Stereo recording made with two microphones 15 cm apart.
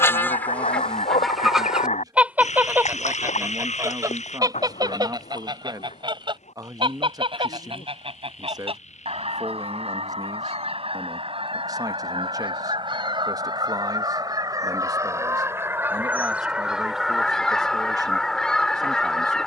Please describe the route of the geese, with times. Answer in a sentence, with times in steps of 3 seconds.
You can hear the geese in the centre from 0 s, on the right from 3 s and in the centre from 15 s.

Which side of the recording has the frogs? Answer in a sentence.
In this clip you hear the frogs on the left.